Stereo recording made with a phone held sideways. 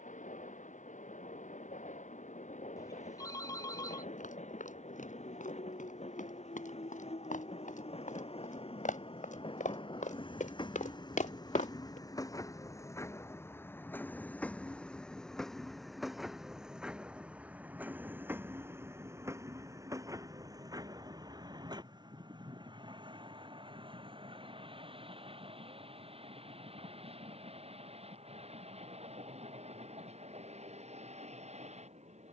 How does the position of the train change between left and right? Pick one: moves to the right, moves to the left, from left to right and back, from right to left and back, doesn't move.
moves to the right.